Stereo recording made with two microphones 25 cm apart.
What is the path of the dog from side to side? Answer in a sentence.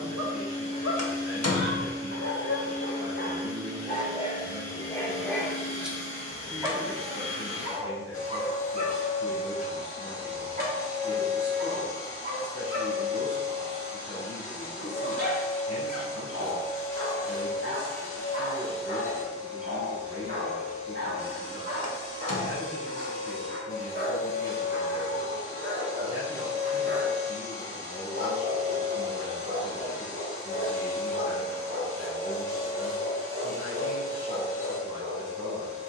You can hear the dog move to the right.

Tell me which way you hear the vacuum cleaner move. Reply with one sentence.
In this clip you hear the vacuum cleaner stay put.